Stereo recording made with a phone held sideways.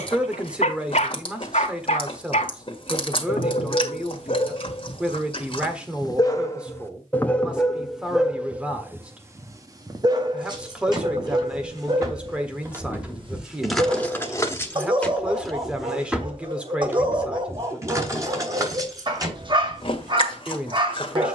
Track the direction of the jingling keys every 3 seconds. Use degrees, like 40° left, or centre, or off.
off, off, off, 30° right, centre, 10° right, 30° right.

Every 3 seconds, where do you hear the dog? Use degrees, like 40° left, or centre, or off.
60° left, 50° left, 10° left, 30° right, 40° right, 40° right, 40° right.